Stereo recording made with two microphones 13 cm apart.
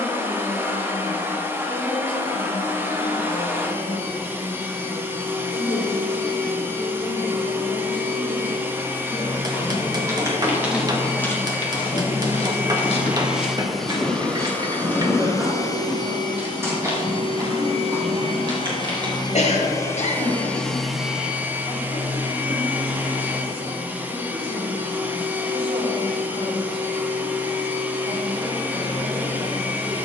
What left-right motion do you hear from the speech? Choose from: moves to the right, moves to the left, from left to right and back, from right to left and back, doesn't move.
moves to the right.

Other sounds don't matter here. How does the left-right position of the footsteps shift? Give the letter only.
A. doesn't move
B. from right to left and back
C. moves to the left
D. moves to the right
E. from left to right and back
B.